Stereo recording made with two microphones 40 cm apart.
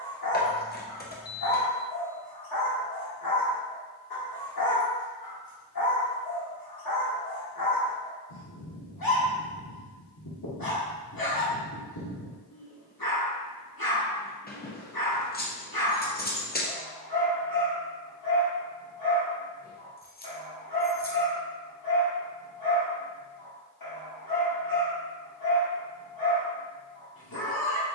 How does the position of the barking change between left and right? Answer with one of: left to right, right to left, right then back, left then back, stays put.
stays put.